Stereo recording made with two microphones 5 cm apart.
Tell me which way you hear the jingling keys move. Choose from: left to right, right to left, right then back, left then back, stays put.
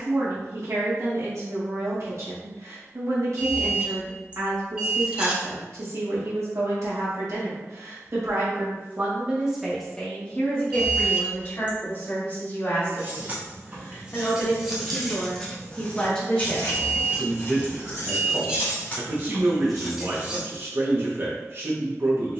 left then back.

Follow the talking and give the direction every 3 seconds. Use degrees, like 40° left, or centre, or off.
60° right, 60° right, 60° right, 20° left, 40° left, 10° left, 40° right, 50° right.